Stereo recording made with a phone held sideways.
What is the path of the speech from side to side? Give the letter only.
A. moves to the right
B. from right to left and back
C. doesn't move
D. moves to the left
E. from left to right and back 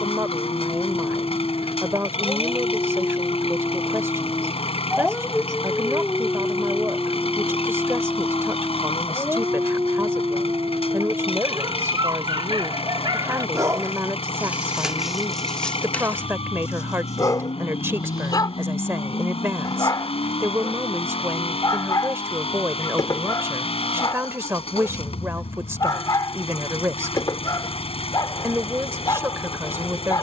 C.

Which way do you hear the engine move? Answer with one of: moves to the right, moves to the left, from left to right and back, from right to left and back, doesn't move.
doesn't move.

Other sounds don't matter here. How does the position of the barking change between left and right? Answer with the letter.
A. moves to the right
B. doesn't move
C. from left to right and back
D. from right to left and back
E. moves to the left
C.